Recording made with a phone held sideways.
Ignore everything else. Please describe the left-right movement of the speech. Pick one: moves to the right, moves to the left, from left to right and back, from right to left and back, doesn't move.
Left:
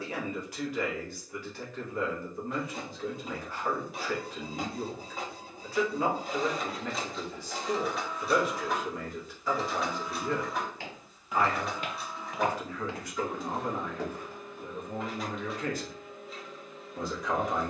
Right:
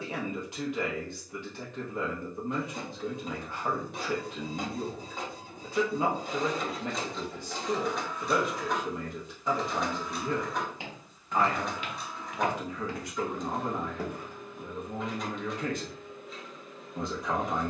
doesn't move.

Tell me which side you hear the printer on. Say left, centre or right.
centre.